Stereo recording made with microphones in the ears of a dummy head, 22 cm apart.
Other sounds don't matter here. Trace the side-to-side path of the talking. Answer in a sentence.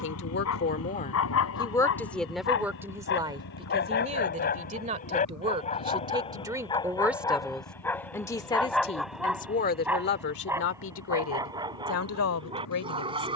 You can hear the talking move from left to right and back again.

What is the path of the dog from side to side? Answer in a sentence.
In this clip you hear the dog move to the right.